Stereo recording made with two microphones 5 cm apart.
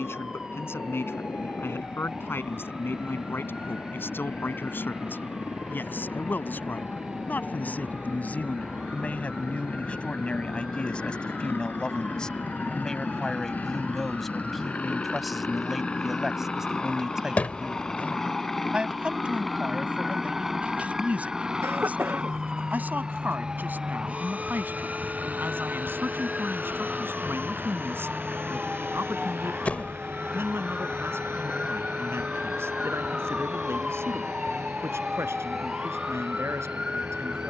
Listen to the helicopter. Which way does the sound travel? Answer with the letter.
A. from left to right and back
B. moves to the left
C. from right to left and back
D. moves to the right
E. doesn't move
D.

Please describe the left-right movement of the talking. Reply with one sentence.
You can hear the talking move to the right.